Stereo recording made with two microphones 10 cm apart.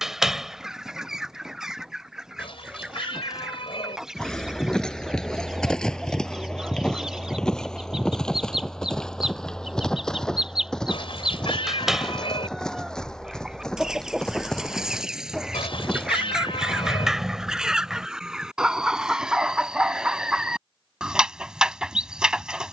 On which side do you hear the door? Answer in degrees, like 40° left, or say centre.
centre.